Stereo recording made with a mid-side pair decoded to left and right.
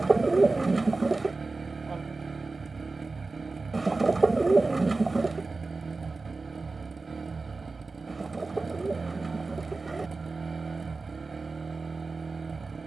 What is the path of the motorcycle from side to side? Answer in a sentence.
In this clip you hear the motorcycle stay in one place.